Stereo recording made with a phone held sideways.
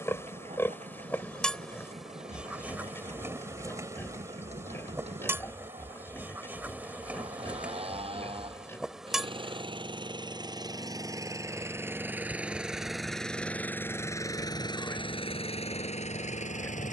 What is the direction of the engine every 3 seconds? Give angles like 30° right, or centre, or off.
60° right, 50° right, 50° right, 30° right, 10° left, 50° left.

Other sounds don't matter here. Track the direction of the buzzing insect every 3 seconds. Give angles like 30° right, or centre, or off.
centre, 20° right, 10° right, centre, 10° left, 10° left.